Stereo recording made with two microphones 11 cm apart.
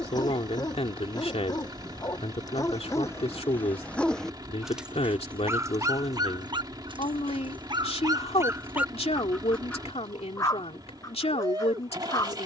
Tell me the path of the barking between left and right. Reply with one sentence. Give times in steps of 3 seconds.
In this clip you hear the barking on the left from 0 s, in the centre from 3 s, on the right from 6 s and on the left from 9 s.